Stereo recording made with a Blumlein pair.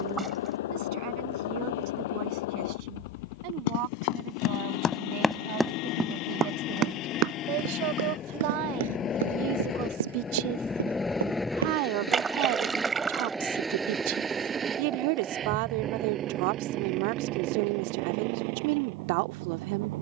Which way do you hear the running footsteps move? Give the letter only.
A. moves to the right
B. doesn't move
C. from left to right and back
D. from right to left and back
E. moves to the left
A.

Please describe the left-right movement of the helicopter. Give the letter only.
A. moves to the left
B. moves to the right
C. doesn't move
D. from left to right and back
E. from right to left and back
B.